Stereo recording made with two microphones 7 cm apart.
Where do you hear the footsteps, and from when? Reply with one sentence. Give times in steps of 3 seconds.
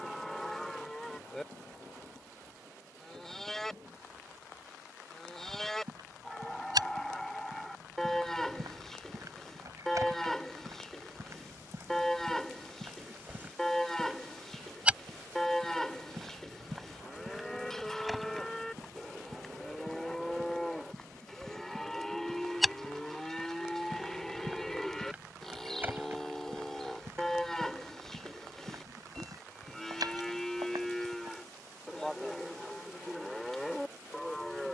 You can hear the footsteps not at all from 0 s, on the right from 3 s, in the centre from 15 s, on the right from 24 s and not at all from 33 s.